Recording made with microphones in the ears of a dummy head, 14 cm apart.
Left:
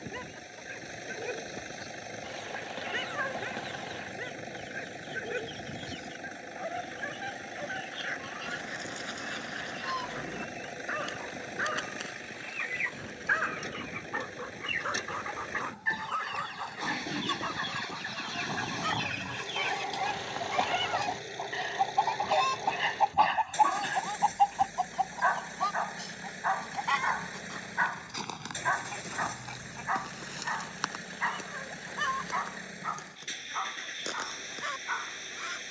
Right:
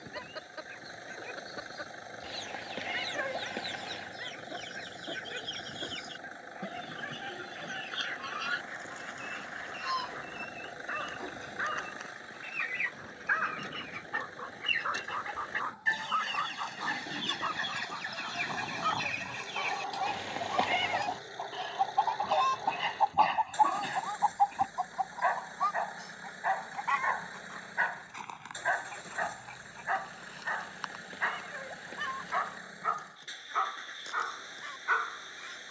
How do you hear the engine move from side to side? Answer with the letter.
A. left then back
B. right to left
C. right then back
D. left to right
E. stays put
E.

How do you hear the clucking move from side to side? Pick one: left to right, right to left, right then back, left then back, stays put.
right to left.